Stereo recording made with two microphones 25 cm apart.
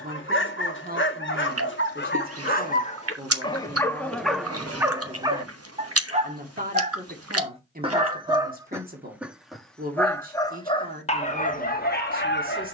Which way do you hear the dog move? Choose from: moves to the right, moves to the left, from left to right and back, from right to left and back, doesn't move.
from left to right and back.